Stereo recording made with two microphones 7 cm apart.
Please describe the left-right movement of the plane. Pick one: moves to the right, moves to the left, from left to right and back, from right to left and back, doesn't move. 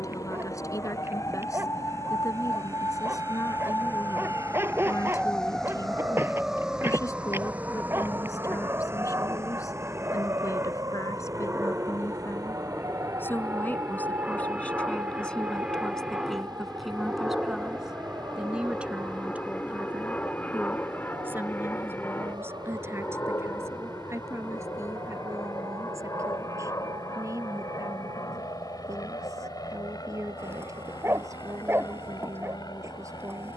moves to the left.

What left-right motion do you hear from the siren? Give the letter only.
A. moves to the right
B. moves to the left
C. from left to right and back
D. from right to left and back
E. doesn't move
A.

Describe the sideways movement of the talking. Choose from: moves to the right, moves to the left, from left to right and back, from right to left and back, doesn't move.
moves to the right.